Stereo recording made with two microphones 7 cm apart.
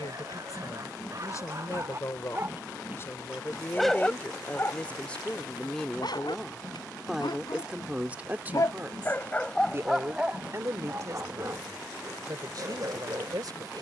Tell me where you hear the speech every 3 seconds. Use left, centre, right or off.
left, left, centre, right, right.